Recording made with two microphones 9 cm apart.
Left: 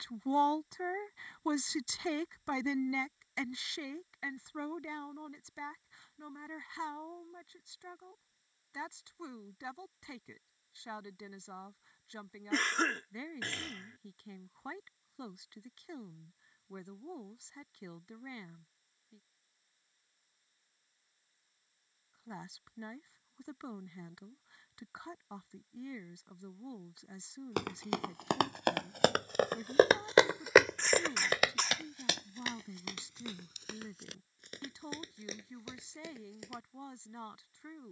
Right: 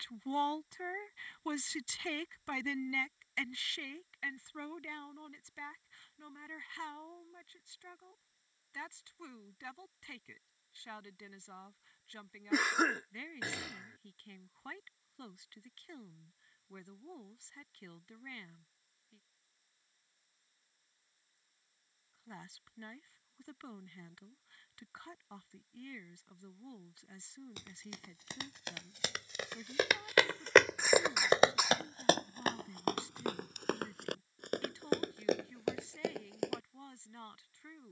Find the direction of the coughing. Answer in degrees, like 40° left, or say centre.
10° right.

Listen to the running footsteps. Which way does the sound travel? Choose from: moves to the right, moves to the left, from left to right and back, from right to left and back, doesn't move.
moves to the right.